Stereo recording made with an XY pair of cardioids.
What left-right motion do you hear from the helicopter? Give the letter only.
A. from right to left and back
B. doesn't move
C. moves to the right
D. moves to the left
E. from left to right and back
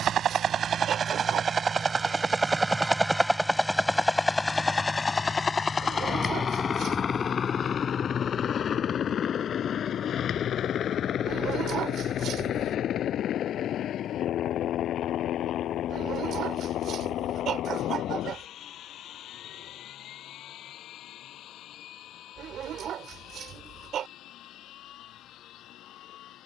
D.